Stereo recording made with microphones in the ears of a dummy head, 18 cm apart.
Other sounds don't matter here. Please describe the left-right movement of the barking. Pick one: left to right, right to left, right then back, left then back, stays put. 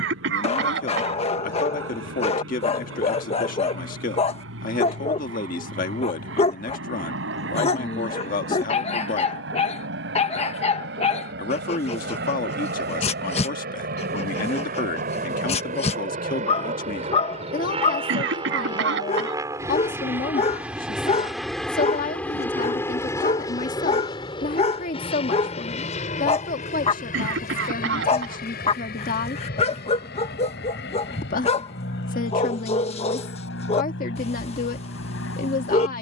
stays put.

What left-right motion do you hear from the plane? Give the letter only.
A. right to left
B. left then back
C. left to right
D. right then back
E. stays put
A.